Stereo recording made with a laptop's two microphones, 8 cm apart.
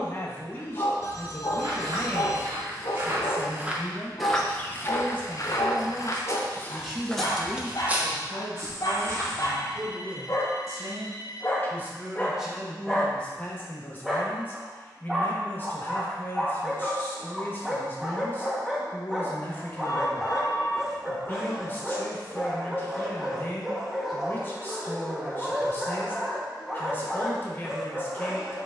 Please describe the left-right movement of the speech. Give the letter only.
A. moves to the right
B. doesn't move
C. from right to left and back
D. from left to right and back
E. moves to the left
D.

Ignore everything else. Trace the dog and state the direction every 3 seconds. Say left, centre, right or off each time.
left, left, left, left, centre, centre, centre, centre, centre, centre.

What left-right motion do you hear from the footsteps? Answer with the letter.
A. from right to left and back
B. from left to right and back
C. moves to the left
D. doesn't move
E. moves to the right
A.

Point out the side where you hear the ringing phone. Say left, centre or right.
left.